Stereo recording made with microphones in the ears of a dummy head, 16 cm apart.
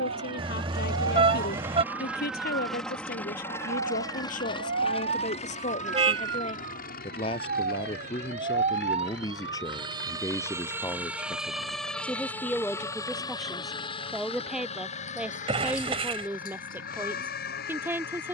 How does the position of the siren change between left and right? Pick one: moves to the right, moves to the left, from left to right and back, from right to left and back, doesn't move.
moves to the left.